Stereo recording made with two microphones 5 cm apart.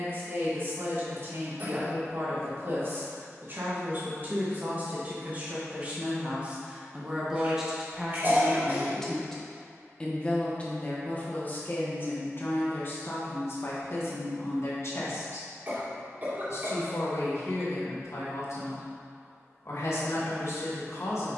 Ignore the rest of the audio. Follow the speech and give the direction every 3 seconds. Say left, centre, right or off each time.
right, right, centre, left, left, left, left.